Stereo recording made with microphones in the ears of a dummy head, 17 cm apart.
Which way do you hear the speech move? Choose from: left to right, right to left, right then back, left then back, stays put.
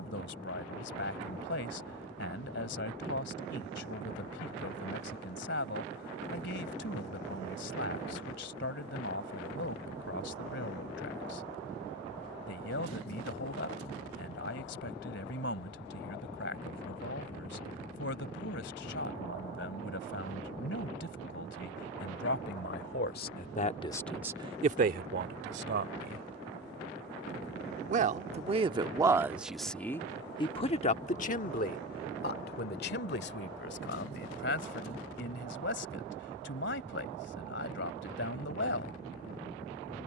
right then back.